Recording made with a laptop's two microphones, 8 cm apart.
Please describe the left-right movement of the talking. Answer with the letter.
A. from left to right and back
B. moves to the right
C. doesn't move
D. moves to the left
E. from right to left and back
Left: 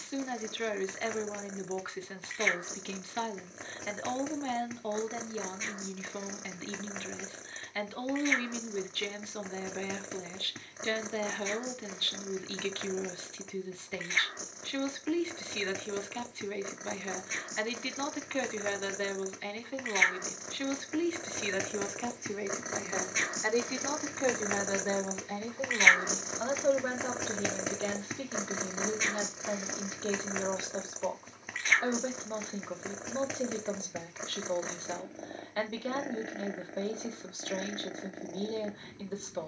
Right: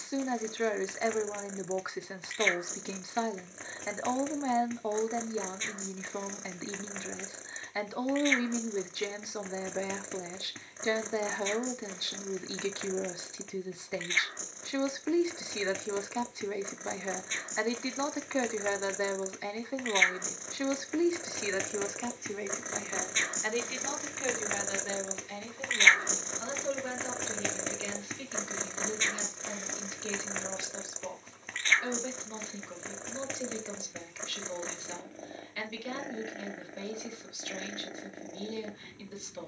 D.